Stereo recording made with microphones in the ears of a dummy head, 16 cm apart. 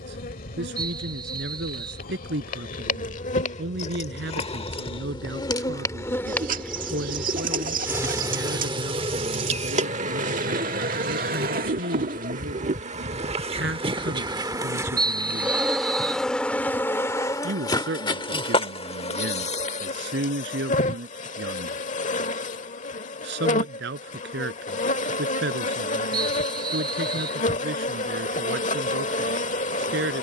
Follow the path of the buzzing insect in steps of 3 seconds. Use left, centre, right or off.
left, left, centre, right, right, centre, left, left, left, left.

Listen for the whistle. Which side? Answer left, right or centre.
right.